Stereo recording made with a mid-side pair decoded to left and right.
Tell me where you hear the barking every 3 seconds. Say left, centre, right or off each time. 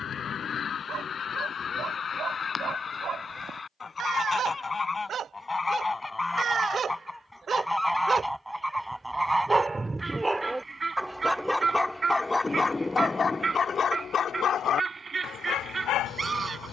right, right, right, centre, left, left.